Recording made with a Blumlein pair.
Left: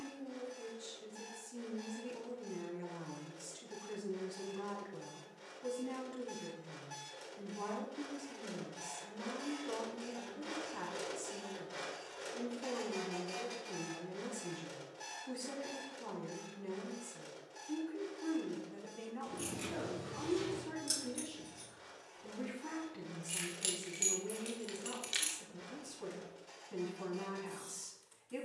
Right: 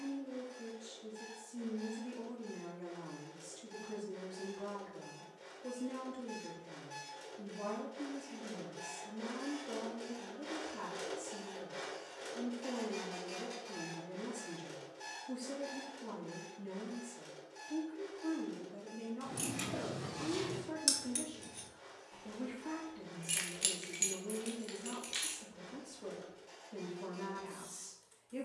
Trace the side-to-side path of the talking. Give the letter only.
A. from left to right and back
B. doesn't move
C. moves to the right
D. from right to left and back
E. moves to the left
B.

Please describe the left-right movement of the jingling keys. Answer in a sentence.
You can hear the jingling keys go from the right side to the left.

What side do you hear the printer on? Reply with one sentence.
In this clip you hear the printer in the centre.